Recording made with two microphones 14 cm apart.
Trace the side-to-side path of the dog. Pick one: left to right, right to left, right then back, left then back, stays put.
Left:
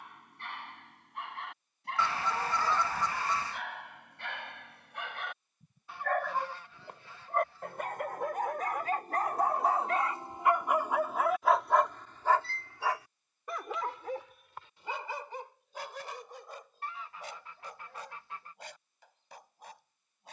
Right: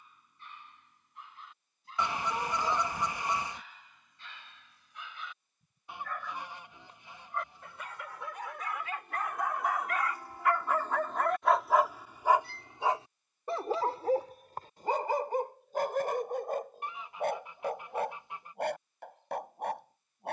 left to right.